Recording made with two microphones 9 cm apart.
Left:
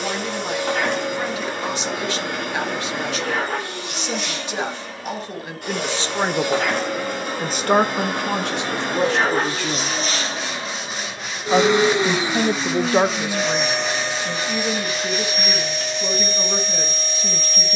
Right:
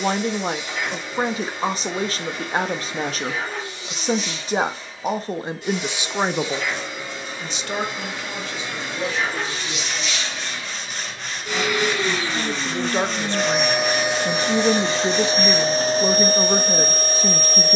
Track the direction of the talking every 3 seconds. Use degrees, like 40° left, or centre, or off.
40° right, 30° right, 40° left, 70° left, 10° left, 30° right.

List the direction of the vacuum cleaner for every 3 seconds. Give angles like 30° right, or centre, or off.
60° left, 60° left, 50° left, 40° left, centre, 40° right.